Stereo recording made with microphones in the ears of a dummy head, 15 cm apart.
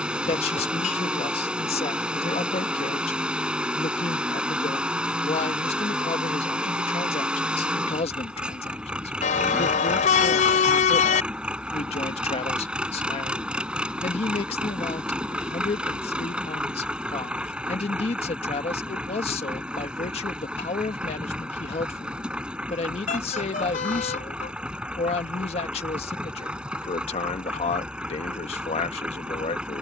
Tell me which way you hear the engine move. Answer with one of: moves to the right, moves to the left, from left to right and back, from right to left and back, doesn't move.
doesn't move.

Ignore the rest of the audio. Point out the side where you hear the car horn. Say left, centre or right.
left.